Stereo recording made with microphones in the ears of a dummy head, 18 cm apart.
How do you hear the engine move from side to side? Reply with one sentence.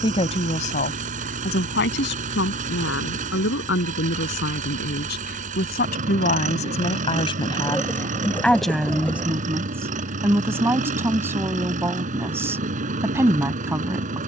In this clip you hear the engine stay put.